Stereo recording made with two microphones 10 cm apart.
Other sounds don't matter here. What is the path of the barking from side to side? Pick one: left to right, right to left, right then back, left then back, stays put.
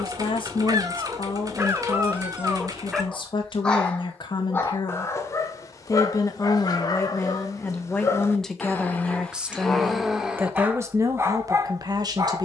left then back.